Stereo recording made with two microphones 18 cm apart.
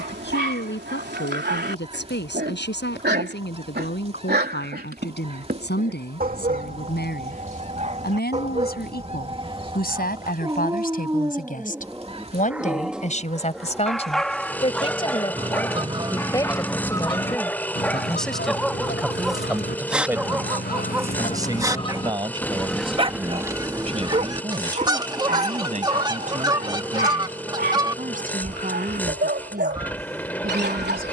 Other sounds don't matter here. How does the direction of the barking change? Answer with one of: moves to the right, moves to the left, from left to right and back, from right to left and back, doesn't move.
from right to left and back.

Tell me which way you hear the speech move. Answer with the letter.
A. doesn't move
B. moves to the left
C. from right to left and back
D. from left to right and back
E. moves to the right
E.